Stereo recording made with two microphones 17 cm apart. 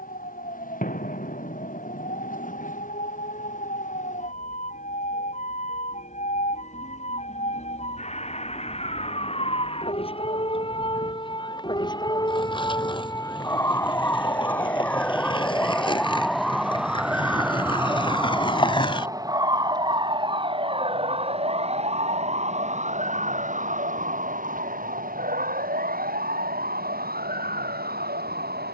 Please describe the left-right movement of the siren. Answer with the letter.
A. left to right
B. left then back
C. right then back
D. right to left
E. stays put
A.